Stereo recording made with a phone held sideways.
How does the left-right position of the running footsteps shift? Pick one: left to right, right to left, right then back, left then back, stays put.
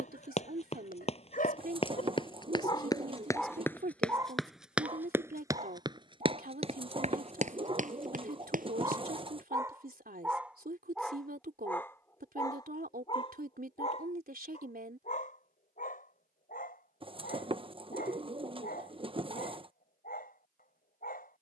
left to right.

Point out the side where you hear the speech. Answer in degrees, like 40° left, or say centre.
70° right.